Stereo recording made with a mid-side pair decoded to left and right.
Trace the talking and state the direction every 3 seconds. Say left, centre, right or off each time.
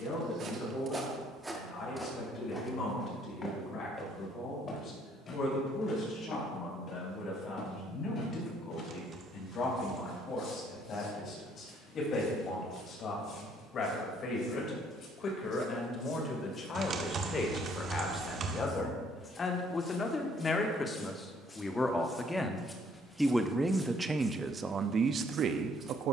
left, left, left, left, left, left, left, centre, right.